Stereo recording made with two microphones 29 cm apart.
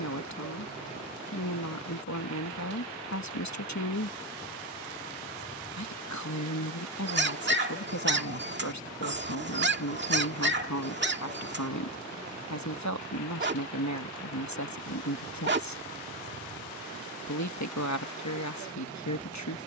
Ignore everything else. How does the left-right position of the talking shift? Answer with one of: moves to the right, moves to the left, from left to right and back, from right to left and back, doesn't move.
doesn't move.